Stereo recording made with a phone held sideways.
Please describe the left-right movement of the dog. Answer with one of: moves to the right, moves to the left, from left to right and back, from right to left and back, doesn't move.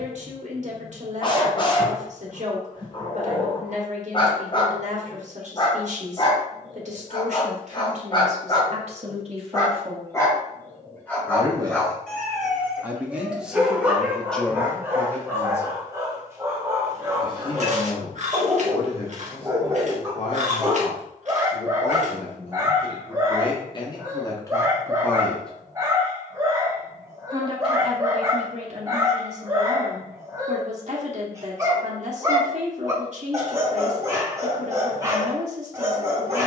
moves to the right.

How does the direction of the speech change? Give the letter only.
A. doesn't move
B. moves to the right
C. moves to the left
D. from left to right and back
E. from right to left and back
E.